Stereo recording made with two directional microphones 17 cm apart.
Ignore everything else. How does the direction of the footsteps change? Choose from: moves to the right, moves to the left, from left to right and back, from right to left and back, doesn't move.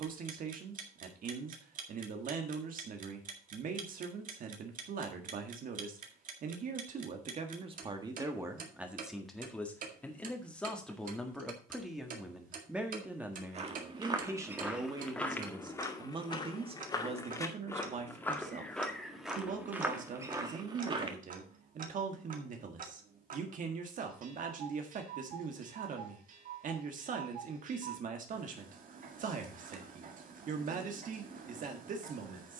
from right to left and back.